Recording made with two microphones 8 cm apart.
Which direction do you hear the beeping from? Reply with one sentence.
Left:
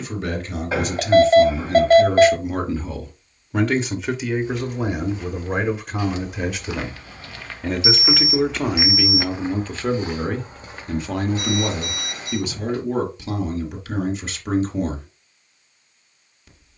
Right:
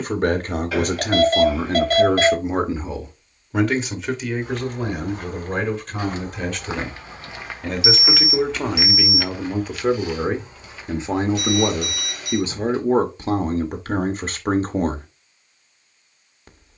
You can hear the beeping on the left.